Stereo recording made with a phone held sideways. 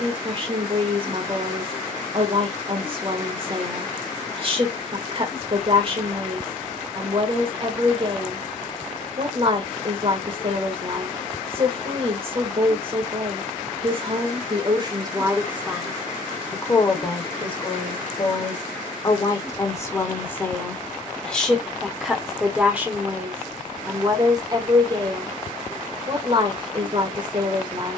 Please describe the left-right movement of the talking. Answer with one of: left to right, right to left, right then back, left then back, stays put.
left then back.